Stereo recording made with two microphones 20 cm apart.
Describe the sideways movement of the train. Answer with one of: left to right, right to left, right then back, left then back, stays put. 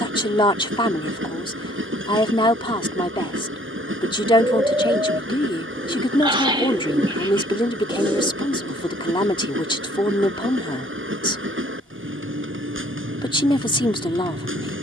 stays put.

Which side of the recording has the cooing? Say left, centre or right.
right.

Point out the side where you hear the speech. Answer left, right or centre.
left.